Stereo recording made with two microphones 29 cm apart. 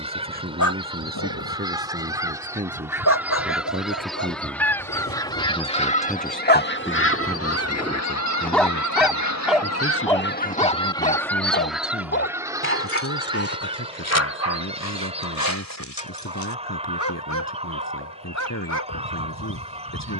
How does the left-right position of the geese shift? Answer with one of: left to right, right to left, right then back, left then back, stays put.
left then back.